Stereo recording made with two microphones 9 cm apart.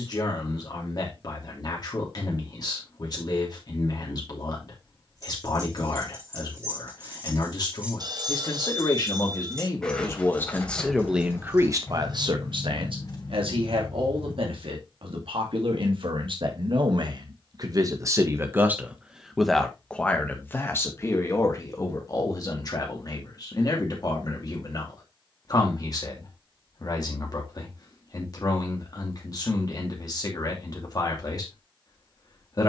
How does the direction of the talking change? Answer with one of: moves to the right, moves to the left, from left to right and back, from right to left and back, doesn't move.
from left to right and back.